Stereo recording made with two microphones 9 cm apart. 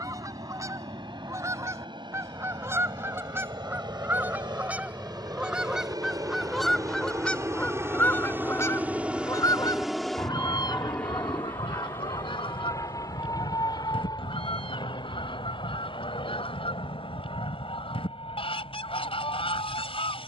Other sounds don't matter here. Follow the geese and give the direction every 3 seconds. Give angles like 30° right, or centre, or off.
30° right, 20° right, 10° left, 50° left, 80° left, 80° left, 80° left.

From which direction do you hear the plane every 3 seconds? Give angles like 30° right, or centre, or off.
70° right, 60° right, 30° right, 10° left, 40° left, 50° left, 60° left.